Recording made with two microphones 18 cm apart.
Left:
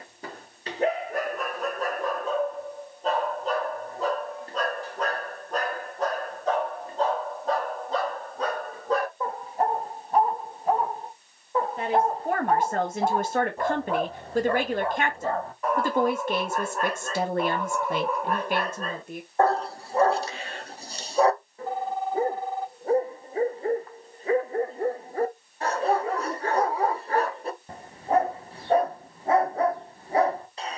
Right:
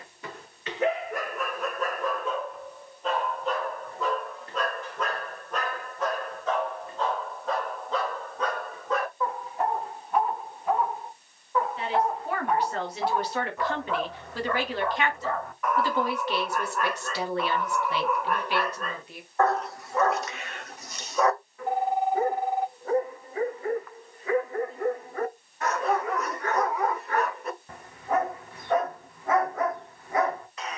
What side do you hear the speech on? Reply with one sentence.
You can hear the speech on the left.